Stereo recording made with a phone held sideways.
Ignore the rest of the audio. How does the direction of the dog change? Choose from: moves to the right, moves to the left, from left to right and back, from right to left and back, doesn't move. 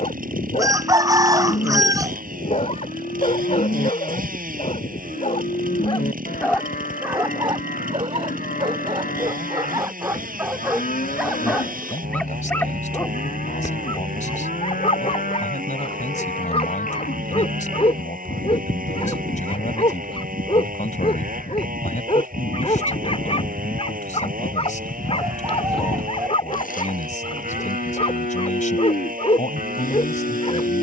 from left to right and back.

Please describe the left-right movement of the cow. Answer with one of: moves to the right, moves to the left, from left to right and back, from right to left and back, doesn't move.
doesn't move.